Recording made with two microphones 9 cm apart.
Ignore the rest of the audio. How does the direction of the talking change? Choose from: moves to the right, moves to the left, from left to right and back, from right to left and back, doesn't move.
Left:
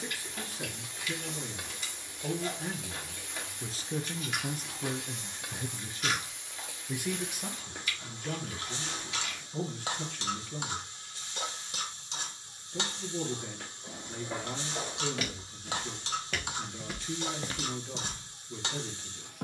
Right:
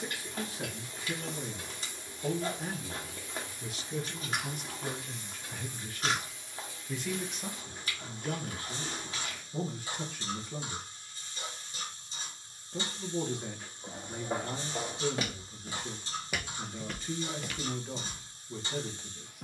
from right to left and back.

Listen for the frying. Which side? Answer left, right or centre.
left.